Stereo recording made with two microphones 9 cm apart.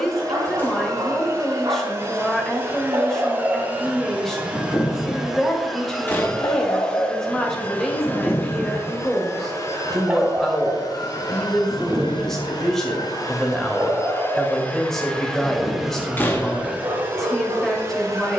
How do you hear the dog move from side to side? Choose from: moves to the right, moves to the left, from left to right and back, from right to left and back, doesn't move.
from right to left and back.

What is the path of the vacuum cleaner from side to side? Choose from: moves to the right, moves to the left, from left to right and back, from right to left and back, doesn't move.
from right to left and back.